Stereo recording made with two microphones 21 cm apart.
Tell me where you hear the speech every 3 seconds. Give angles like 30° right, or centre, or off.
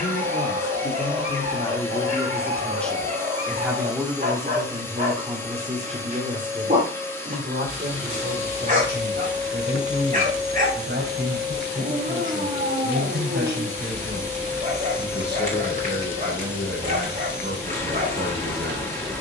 20° left, 20° right, 40° right, 50° right, 50° right, 50° right, 50° right.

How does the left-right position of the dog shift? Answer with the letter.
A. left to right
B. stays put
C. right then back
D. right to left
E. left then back
B.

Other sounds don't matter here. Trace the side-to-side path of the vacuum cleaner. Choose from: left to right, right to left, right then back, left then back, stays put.
stays put.